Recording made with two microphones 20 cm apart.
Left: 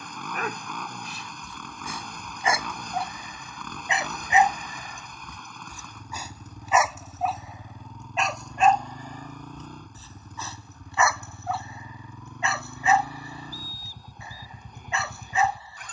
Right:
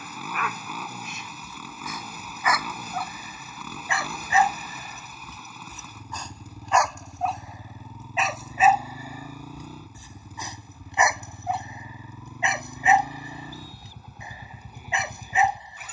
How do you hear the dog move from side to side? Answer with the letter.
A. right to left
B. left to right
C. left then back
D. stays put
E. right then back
B.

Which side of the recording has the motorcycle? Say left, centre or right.
centre.